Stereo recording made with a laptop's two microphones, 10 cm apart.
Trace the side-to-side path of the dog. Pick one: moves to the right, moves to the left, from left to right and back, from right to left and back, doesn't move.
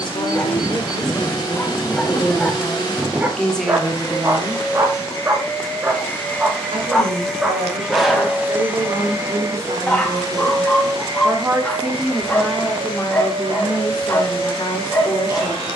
from left to right and back.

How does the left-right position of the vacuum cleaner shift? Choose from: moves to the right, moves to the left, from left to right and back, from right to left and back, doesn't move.
moves to the right.